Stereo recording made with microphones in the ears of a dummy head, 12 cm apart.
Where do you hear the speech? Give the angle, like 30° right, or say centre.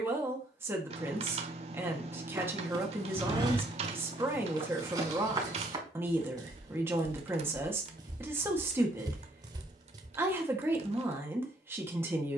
20° right.